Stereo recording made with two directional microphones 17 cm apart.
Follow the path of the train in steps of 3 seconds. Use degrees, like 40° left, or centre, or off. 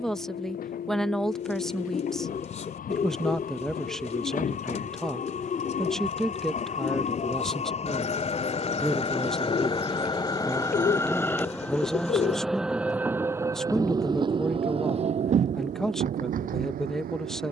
60° left, 50° left, 40° left, 20° left, 20° right, 50° right.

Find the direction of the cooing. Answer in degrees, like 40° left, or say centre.
40° left.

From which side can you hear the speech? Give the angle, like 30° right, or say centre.
centre.